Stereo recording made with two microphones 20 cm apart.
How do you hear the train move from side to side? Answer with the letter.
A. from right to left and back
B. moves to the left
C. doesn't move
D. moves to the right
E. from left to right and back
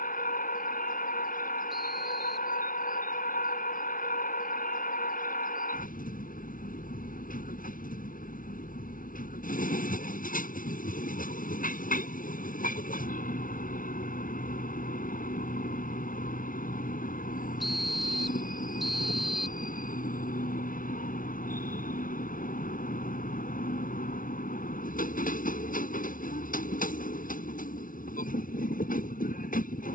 C.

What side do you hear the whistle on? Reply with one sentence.
You can hear the whistle in the centre.